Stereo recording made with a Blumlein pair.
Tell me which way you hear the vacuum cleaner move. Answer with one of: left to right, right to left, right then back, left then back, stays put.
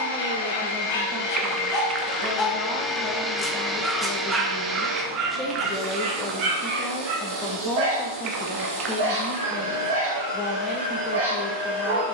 left to right.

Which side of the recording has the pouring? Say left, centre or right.
right.